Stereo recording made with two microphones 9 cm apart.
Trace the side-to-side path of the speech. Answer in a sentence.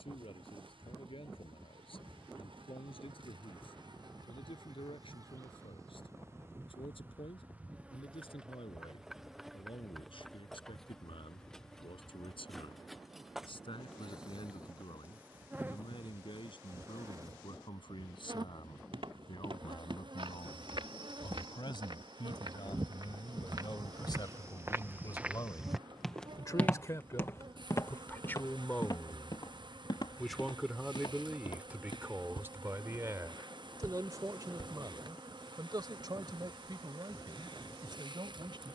You can hear the speech travel towards the right.